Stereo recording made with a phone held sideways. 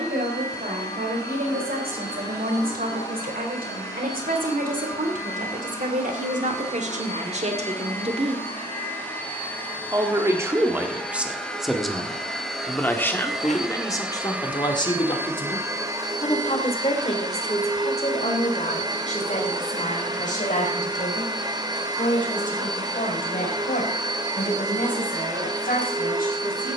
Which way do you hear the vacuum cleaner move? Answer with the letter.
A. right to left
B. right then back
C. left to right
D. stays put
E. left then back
C.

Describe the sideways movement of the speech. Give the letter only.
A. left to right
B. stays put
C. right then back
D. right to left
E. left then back
D.